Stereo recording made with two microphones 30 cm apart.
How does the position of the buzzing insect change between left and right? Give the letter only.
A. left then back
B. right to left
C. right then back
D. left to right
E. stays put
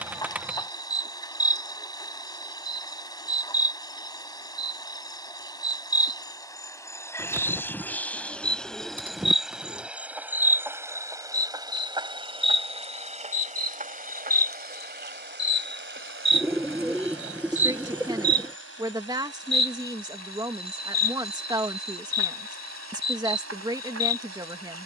D.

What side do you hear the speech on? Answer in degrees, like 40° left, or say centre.
10° right.